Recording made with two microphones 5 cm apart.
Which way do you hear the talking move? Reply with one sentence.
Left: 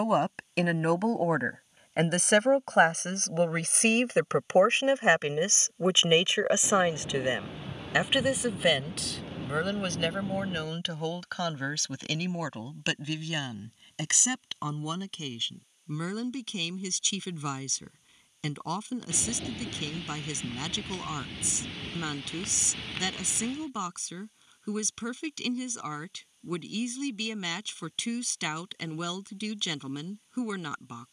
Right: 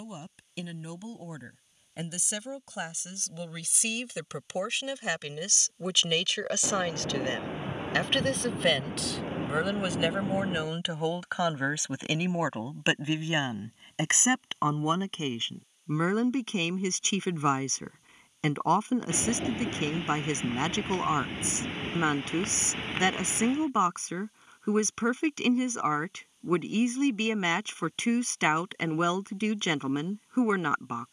In this clip you hear the talking travel towards the right.